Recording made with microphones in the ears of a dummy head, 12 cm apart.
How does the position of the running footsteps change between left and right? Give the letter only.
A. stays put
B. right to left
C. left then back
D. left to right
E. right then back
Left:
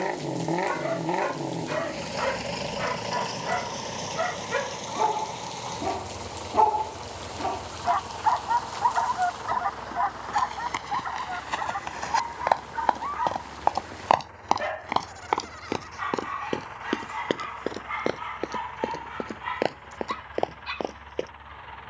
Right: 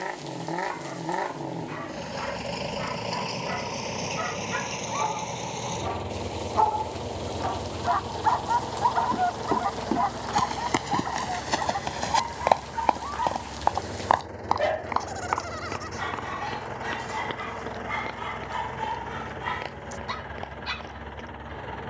B.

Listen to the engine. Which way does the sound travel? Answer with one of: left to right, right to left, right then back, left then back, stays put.
left to right.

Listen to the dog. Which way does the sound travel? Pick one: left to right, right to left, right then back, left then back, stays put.
left to right.